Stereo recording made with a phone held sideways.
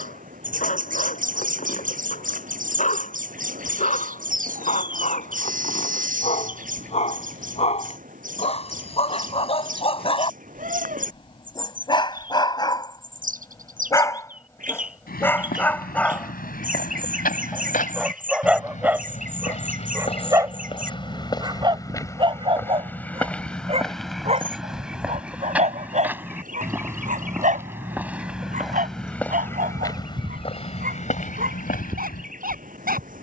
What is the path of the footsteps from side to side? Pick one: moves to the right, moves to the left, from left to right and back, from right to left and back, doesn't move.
from left to right and back.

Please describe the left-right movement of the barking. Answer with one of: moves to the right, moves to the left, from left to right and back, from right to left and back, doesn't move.
moves to the right.